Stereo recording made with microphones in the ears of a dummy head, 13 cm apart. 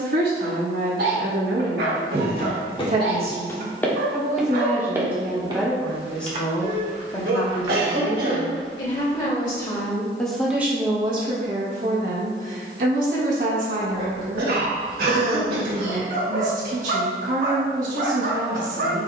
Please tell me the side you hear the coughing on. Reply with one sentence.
You can hear the coughing on the right.